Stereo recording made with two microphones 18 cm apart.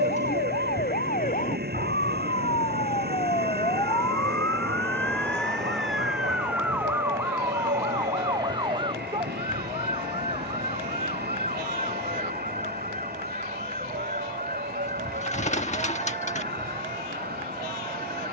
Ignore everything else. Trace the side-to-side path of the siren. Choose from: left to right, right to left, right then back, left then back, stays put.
left to right.